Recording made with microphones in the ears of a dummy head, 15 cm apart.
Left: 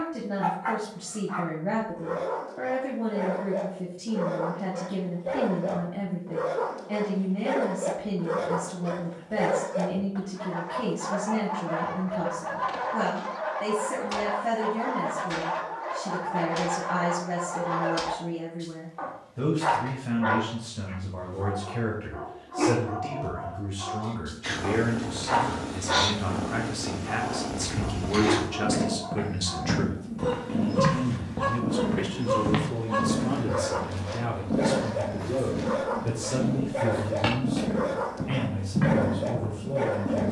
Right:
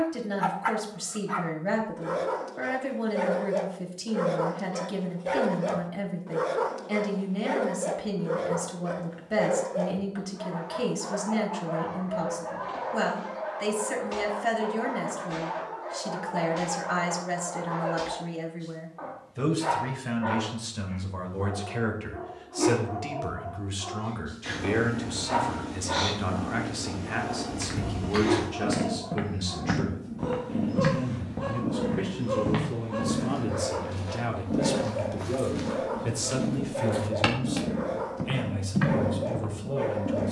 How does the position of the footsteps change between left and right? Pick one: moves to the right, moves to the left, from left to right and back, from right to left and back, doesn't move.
from right to left and back.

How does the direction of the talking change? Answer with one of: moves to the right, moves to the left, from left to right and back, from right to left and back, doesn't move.
from right to left and back.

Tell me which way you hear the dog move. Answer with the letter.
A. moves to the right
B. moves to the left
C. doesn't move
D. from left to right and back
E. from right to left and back
B.